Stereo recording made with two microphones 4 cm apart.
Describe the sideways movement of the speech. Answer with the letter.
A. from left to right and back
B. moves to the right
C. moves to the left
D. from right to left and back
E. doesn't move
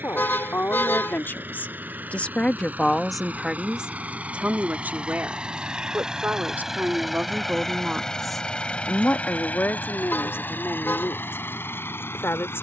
A.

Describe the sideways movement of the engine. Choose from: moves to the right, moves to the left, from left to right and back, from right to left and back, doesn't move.
moves to the left.